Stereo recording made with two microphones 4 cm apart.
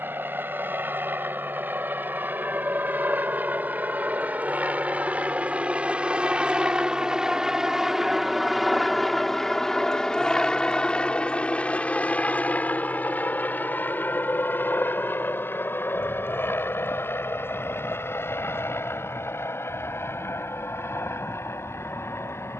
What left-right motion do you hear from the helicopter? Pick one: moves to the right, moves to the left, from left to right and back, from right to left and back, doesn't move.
moves to the left.